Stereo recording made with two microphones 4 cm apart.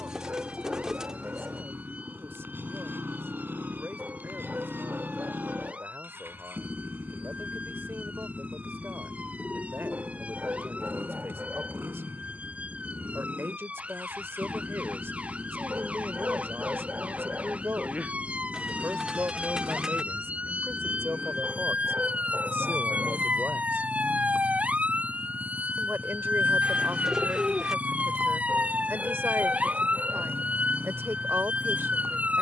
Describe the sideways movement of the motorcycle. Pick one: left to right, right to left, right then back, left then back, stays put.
stays put.